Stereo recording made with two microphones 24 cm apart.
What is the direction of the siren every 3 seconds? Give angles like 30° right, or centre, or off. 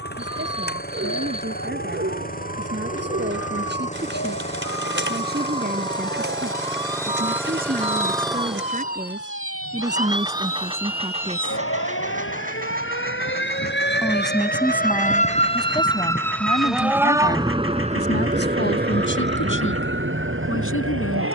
80° left, 80° left, 80° left, 70° left, 50° left, centre, 50° right.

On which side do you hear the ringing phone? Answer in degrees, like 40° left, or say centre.
30° right.